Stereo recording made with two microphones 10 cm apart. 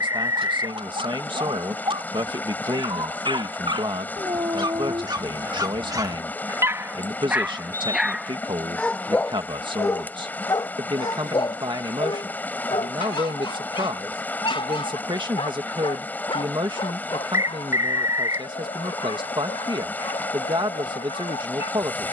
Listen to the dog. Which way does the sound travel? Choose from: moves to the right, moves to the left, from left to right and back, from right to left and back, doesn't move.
moves to the left.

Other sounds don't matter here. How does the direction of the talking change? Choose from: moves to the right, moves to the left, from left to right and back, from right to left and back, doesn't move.
doesn't move.